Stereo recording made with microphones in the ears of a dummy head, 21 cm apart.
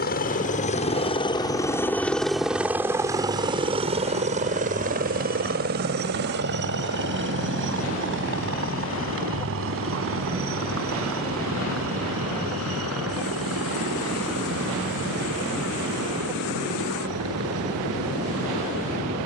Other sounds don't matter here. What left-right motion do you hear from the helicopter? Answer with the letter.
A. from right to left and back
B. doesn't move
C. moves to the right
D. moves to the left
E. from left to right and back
C.